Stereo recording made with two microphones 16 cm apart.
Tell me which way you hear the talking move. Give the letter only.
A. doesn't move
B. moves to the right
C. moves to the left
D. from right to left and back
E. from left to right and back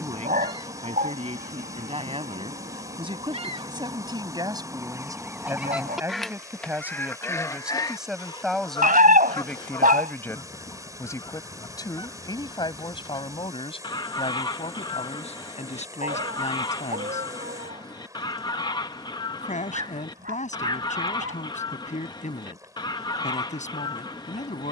C.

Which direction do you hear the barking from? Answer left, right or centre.
right.